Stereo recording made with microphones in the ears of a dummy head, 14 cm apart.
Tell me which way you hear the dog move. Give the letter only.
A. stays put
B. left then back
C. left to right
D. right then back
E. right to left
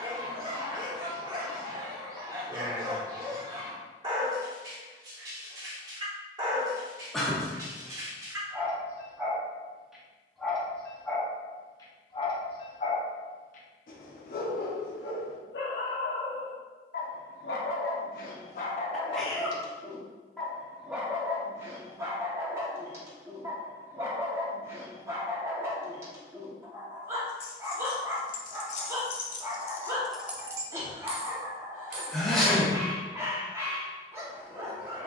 B.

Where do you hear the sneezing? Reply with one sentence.
You can hear the sneezing in the centre.